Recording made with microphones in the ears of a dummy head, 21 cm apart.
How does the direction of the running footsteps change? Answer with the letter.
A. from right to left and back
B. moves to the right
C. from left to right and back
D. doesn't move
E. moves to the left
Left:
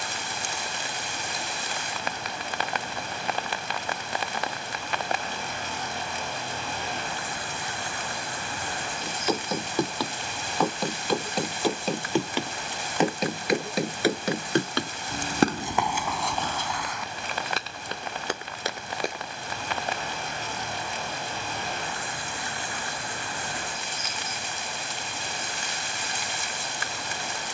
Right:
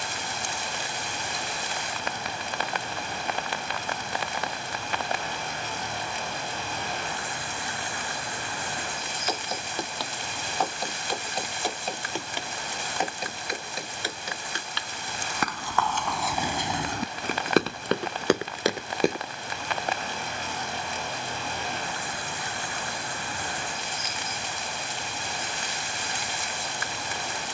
B.